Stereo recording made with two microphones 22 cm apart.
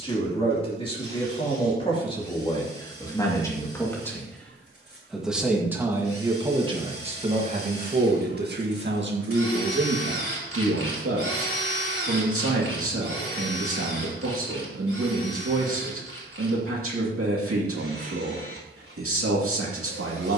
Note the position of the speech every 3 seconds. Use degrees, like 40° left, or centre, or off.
20° left, centre, 30° right, 70° right, 80° right, 80° right, 80° right.